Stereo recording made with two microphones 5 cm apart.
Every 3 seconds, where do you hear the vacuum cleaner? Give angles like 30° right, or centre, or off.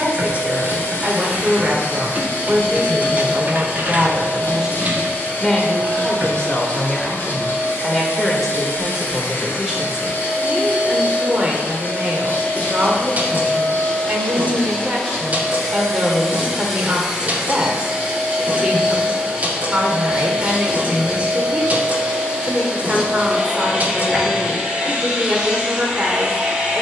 50° left, 50° left, 50° left, 40° left, 20° left, centre, 20° right, 20° right, 20° right.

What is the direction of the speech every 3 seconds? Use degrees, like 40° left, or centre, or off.
30° right, 20° right, 10° left, 20° right, 30° right, 30° right, 30° right, 30° right, 30° right.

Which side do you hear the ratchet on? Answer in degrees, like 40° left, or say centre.
40° right.